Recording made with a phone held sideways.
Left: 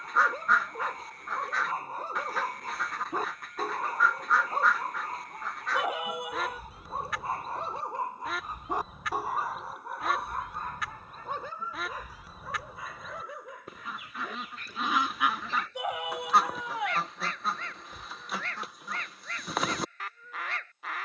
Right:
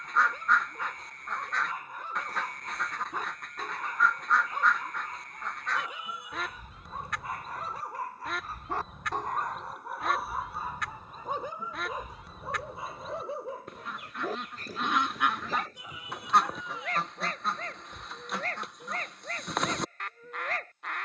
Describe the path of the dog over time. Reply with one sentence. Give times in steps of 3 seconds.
You can hear the dog on the left from 0 s, in the centre from 9 s and on the right from 12 s.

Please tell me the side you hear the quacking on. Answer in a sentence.
In this clip you hear the quacking in the centre.